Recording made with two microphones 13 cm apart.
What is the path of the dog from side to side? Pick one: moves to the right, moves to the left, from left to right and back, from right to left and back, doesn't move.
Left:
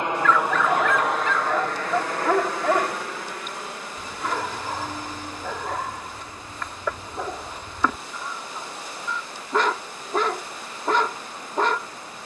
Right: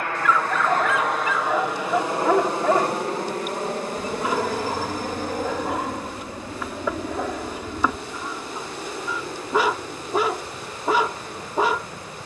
doesn't move.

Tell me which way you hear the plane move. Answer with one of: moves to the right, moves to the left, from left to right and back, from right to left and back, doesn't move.
moves to the right.